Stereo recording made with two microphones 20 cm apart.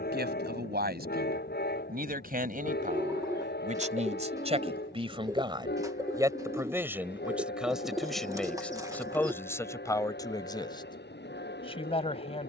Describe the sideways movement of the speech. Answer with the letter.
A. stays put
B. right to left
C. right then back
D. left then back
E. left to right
B.